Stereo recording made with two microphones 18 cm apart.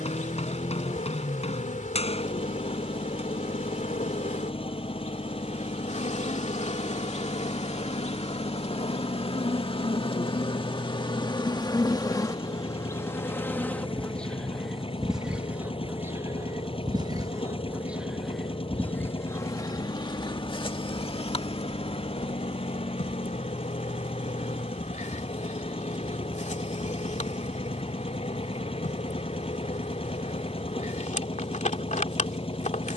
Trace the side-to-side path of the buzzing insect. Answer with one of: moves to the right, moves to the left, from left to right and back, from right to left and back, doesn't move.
from left to right and back.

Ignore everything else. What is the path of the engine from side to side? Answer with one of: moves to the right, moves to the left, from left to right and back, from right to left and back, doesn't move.
doesn't move.